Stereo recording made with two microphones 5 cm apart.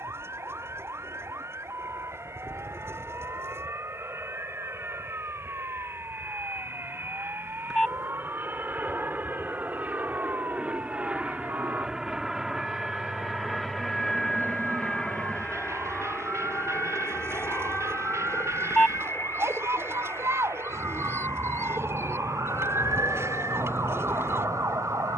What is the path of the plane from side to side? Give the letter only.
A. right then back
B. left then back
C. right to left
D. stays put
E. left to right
C.